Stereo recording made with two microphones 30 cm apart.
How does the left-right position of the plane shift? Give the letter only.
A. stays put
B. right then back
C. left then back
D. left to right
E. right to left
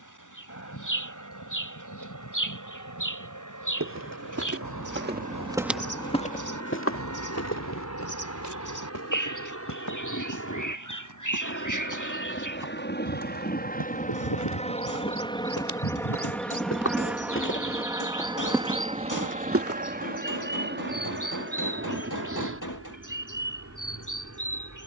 D.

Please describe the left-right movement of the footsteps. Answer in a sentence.
In this clip you hear the footsteps move from right to left and back again.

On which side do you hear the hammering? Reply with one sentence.
You can hear the hammering on the left.